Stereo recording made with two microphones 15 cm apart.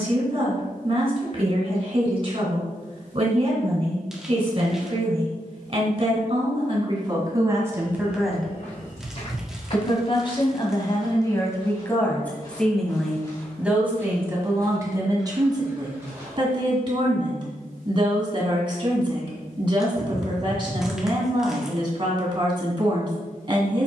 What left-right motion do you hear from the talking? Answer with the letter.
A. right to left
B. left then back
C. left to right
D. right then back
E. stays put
B.